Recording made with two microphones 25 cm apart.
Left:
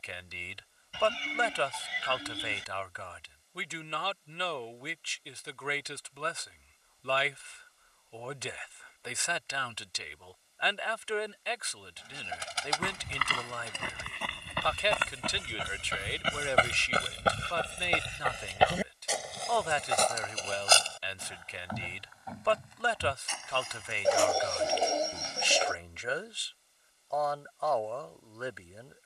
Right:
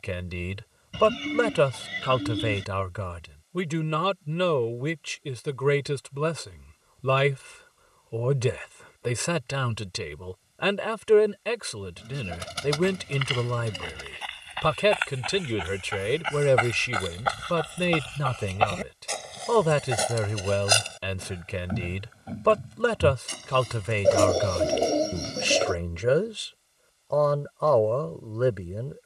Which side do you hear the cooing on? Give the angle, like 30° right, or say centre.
50° right.